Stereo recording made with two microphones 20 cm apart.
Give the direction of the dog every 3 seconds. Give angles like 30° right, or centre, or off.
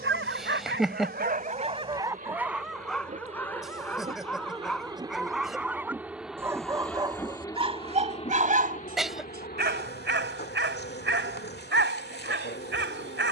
40° right, centre, 30° right, 70° right, 70° right.